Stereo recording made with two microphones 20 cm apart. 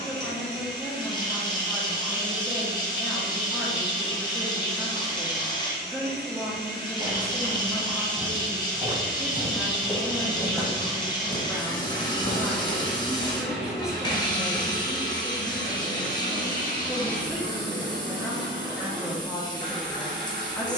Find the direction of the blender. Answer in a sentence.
In this clip you hear the blender on the right.